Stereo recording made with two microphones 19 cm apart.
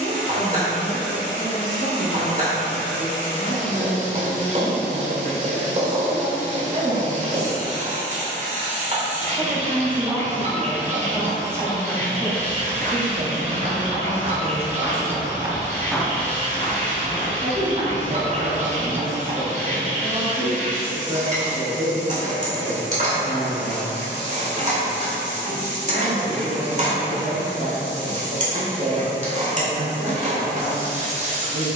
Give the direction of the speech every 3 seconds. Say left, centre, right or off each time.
right, right, right, centre, right, right, right, right, right, right, right.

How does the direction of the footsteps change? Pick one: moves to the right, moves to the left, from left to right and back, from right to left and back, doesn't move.
moves to the left.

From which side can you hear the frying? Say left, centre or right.
right.